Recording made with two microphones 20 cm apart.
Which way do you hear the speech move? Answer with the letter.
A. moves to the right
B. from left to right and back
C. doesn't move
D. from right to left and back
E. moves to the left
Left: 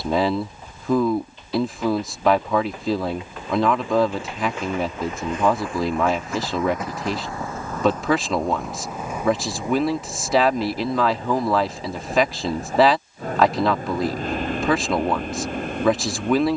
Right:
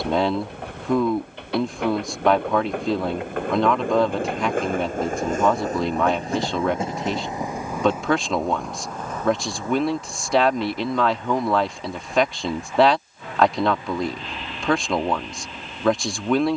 C.